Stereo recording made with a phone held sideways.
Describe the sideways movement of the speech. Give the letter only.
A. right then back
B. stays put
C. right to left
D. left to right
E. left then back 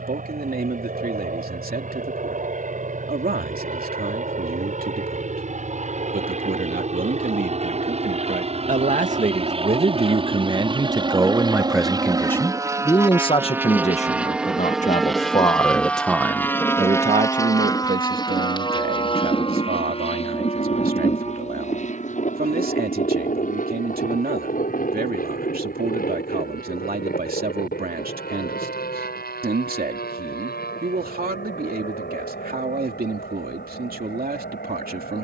E.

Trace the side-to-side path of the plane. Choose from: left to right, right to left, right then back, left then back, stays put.
right to left.